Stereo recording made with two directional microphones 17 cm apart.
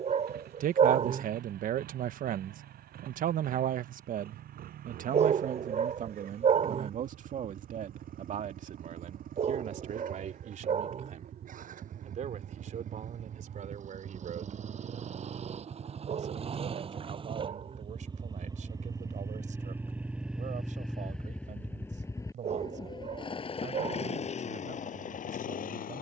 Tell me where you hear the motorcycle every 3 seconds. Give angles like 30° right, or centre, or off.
60° right, 60° right, 60° right, 50° right, 50° right, 30° right, 10° right, 20° left, 50° left.